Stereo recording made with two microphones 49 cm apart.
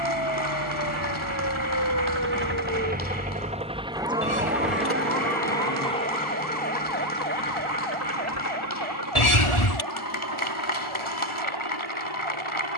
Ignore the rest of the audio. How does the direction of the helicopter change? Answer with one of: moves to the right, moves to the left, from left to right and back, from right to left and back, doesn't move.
moves to the left.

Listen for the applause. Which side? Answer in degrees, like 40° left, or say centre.
80° left.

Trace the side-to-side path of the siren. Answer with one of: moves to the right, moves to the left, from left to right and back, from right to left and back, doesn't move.
moves to the right.